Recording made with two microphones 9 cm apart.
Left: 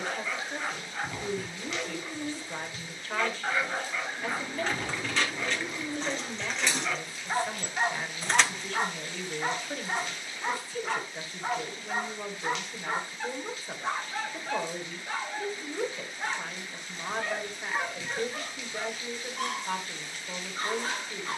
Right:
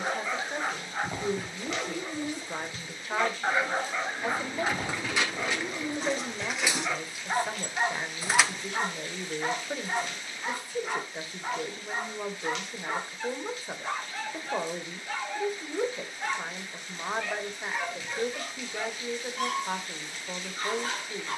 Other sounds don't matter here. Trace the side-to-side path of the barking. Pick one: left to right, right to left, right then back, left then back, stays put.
right to left.